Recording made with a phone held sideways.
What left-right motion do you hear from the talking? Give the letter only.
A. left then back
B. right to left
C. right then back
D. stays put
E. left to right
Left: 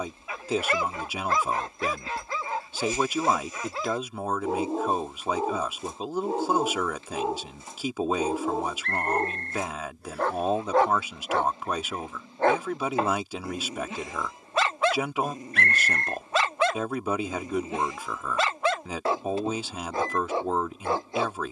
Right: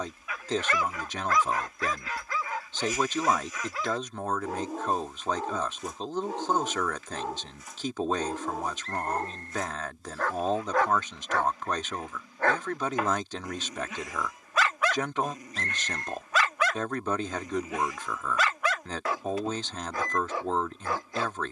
D.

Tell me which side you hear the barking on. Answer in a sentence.
In this clip you hear the barking on the left.